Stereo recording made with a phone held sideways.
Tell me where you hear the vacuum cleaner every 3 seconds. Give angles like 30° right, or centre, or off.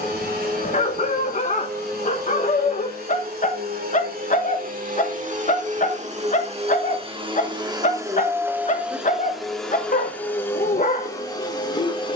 70° right, 60° right, 30° right, 10° left.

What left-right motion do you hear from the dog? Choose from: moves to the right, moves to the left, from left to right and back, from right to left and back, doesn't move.
doesn't move.